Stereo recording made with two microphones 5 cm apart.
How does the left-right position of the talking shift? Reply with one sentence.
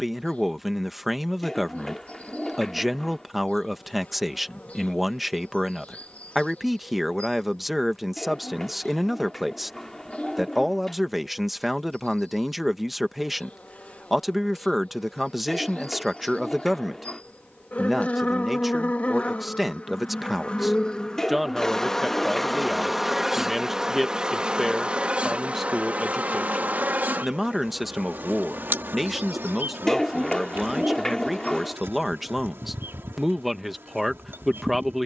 You can hear the talking stay put.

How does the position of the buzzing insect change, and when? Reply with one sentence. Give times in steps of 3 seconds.
In this clip you hear the buzzing insect on the left from 0 s, in the centre from 21 s and on the right from 24 s.